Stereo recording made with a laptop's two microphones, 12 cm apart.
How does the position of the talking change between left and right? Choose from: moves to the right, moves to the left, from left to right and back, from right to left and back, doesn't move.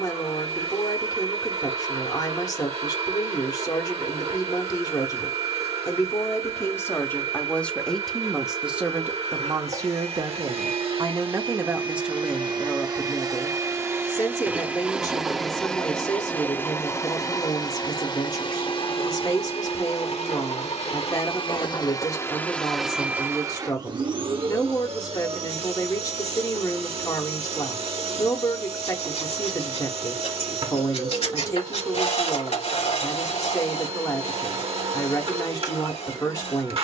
from left to right and back.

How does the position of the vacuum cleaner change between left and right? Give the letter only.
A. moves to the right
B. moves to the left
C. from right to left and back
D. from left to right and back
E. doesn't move
C.